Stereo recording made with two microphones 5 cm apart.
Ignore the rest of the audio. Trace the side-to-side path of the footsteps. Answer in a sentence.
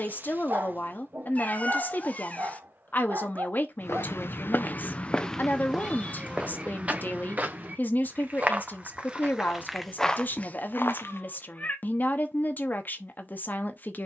In this clip you hear the footsteps go right and come back.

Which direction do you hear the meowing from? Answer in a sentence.
You can hear the meowing on the left.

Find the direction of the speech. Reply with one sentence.
You can hear the speech on the left.